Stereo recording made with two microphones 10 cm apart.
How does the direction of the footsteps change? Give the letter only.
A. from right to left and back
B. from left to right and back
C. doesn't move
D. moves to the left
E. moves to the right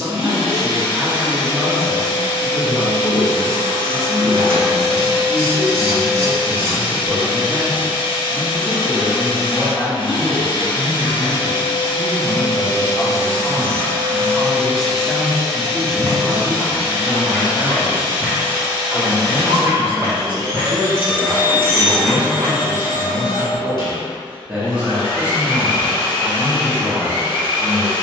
B.